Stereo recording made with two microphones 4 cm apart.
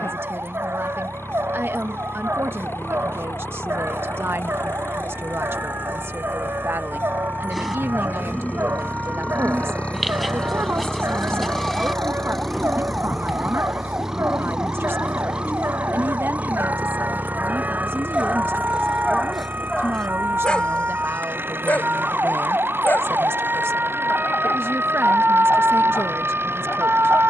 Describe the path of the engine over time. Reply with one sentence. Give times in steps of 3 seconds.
In this clip you hear the engine on the left from 0 s, in the centre from 12 s and on the right from 15 s.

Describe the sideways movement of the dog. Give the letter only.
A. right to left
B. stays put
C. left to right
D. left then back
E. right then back
A.